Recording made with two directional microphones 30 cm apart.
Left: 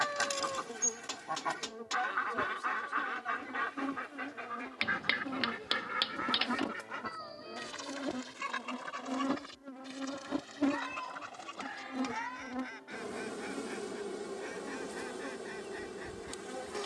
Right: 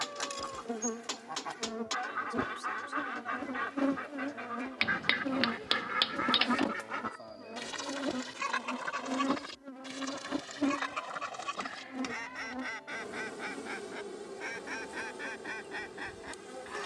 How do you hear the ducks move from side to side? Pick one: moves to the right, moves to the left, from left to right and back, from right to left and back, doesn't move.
moves to the right.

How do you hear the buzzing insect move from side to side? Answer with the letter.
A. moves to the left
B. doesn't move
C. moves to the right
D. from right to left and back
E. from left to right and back
A.